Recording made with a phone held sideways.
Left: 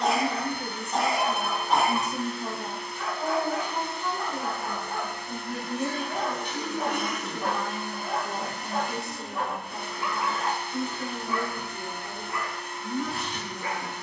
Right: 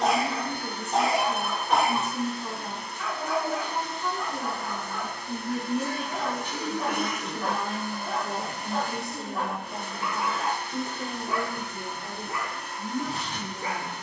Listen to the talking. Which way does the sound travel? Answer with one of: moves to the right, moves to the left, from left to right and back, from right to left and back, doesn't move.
moves to the right.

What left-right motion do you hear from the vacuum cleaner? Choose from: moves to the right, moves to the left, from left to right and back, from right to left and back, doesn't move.
doesn't move.